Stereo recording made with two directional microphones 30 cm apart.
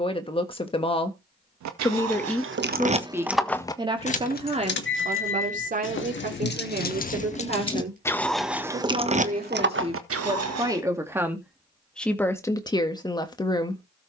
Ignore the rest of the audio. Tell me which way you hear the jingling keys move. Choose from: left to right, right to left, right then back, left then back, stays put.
left then back.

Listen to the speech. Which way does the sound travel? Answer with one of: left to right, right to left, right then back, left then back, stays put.
right then back.